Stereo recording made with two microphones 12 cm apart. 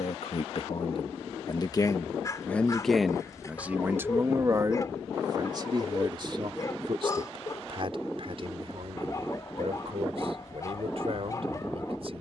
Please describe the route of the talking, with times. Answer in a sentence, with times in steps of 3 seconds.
You can hear the talking on the left from 0 s and on the right from 3 s.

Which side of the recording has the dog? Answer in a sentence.
In this clip you hear the dog on the left.